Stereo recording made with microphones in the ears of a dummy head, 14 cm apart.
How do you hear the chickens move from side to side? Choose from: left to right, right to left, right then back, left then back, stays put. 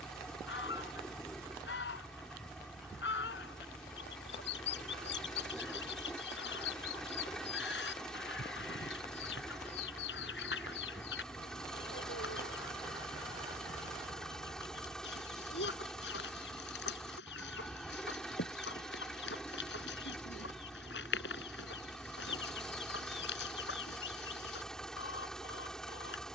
stays put.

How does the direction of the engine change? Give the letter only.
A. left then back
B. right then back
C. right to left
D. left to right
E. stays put
E.